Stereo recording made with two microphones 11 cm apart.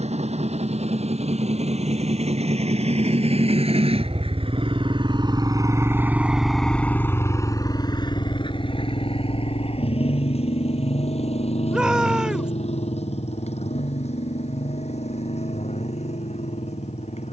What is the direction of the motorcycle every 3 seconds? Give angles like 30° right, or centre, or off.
80° right, 50° right, 30° left, 60° left, 70° left, 80° left.